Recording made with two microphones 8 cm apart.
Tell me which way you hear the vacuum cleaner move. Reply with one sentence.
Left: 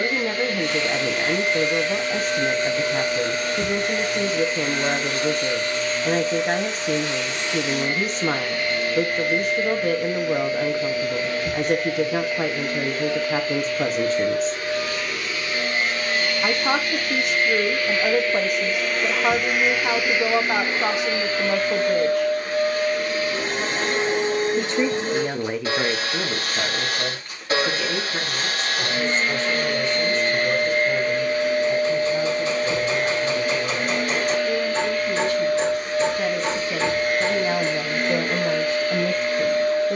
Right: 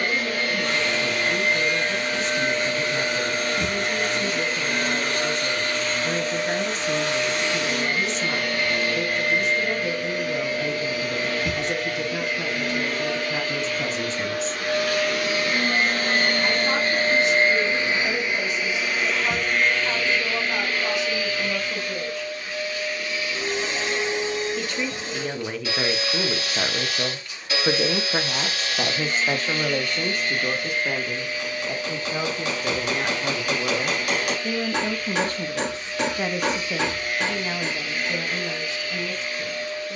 In this clip you hear the vacuum cleaner move to the left.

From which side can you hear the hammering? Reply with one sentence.
In this clip you hear the hammering on the right.